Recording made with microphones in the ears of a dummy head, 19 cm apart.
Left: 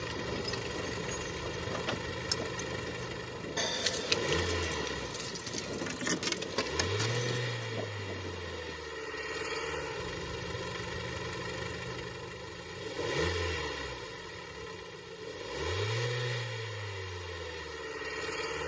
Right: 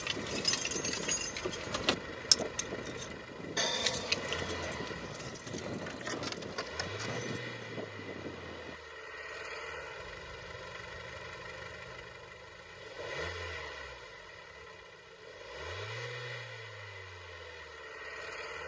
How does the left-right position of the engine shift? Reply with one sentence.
You can hear the engine stay put.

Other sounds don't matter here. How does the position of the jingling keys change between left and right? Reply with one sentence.
You can hear the jingling keys go from the right side to the left.